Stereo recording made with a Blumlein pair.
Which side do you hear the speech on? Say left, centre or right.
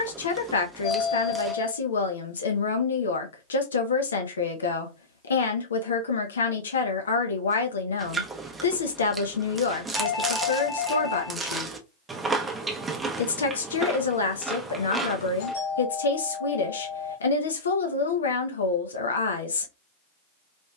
left.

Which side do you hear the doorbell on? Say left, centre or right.
left.